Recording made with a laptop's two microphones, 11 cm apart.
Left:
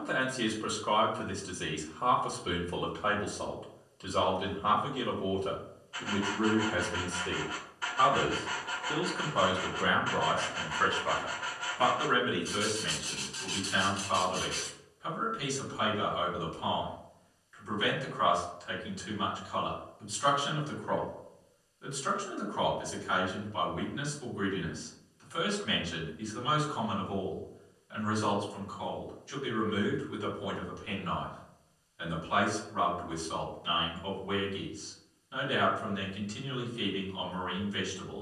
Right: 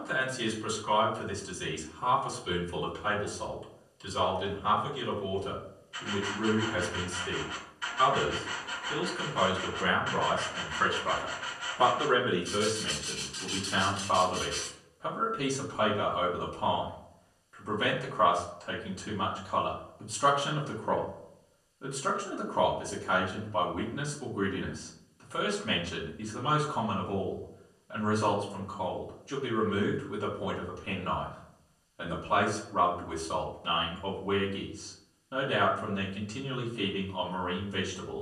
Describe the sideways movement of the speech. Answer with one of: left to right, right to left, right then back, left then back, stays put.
left to right.